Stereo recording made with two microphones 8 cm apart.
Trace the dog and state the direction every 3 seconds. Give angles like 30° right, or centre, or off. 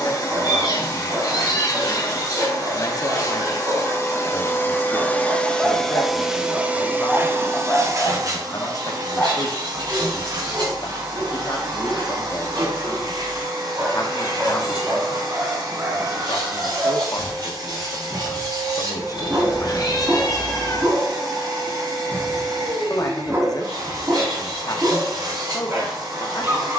40° right, 30° right, 20° left, 10° right, 30° right, 40° right, 40° right, 40° right, 40° right.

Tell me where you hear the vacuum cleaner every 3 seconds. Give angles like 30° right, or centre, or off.
50° left, 30° left, 30° right, 70° right, 80° right, 80° right, 80° right, 80° right, 80° right.